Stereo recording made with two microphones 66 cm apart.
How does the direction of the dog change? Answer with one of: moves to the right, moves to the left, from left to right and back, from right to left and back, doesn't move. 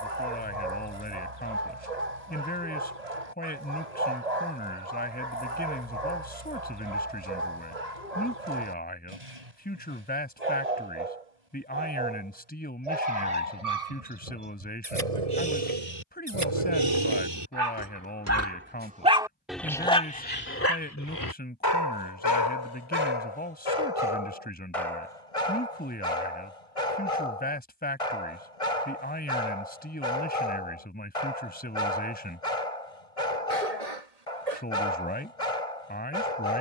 moves to the left.